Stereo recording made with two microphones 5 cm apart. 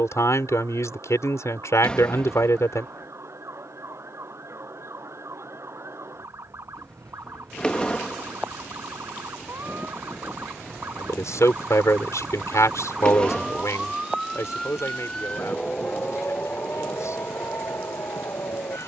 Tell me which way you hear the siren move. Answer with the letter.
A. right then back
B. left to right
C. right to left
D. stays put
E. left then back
C.